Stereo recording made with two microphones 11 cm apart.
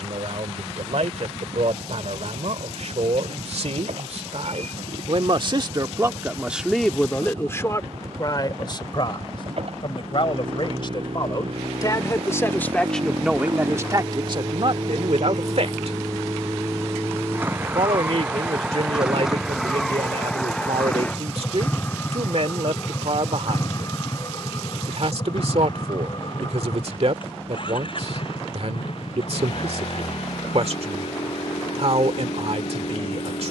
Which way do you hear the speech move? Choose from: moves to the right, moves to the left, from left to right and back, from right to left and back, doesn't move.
from right to left and back.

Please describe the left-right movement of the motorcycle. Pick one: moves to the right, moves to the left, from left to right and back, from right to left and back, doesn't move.
moves to the left.